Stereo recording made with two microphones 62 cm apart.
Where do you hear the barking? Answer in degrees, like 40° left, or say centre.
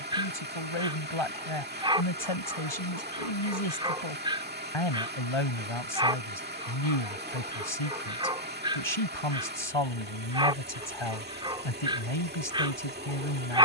10° right.